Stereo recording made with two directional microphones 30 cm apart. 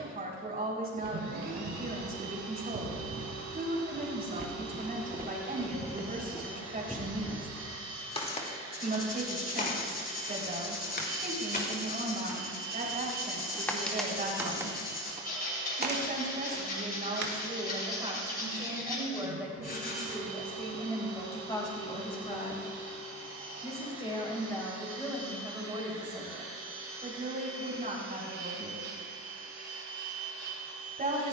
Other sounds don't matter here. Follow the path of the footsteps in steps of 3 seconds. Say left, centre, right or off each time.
right, right, centre, left, centre, right, off, off, off, off, off.